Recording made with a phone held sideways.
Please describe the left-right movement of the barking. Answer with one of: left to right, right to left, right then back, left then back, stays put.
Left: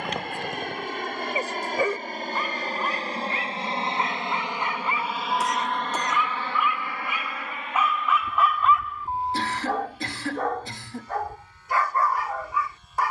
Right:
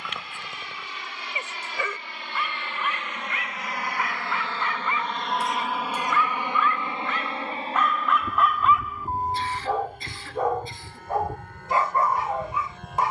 left to right.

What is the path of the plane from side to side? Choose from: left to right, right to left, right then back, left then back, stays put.
left to right.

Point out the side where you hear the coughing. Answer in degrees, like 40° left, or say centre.
80° left.